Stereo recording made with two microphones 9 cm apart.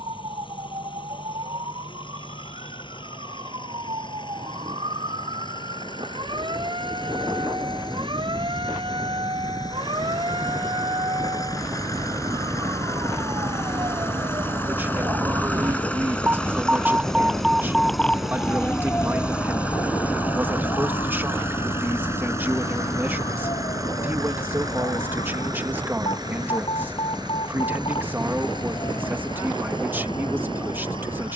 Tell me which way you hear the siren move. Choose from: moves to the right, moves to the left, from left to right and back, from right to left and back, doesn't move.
moves to the left.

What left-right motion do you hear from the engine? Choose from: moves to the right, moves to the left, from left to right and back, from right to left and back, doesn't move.
moves to the right.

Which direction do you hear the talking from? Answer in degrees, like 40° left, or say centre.
20° right.